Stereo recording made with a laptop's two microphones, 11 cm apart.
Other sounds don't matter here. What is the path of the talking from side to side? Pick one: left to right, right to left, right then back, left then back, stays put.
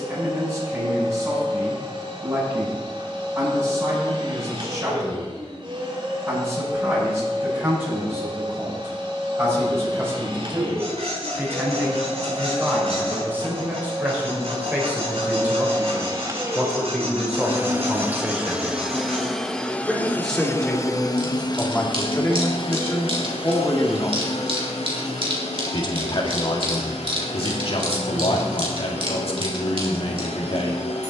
right to left.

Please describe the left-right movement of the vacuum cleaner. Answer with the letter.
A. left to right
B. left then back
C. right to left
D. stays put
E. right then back
C.